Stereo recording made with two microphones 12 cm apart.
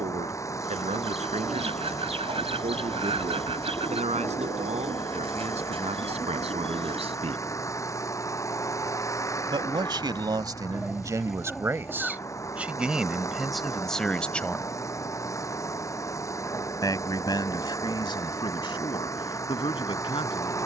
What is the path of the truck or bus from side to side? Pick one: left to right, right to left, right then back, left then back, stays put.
stays put.